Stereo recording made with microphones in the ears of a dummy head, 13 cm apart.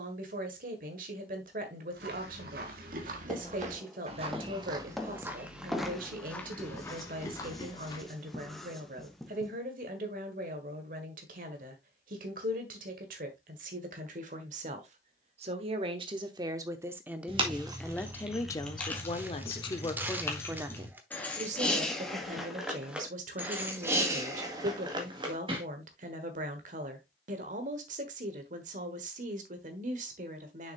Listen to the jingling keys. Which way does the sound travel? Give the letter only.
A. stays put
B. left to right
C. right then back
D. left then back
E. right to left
D.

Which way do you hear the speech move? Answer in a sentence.
In this clip you hear the speech go left and come back.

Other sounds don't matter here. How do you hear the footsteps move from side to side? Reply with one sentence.
You can hear the footsteps move from right to left.